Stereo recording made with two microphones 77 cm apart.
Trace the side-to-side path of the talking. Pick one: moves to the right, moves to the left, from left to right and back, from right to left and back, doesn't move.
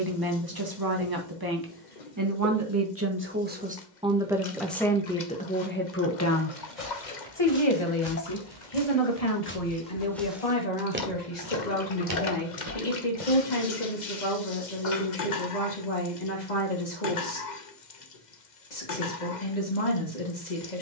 moves to the left.